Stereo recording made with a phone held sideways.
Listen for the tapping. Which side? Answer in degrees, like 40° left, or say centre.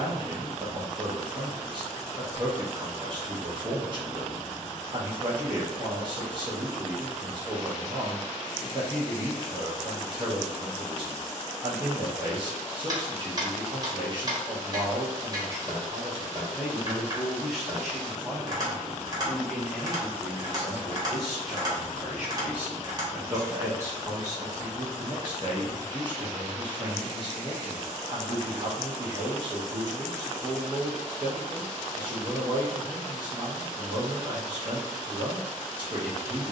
30° right.